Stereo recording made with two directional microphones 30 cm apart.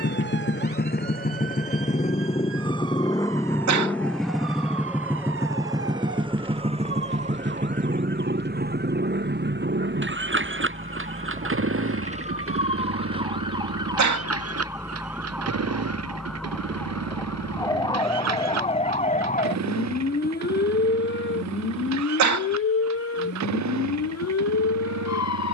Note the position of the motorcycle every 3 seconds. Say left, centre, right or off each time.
left, centre, right, right, right, right, right, right, right.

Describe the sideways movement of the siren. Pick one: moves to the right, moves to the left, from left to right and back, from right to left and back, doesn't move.
moves to the left.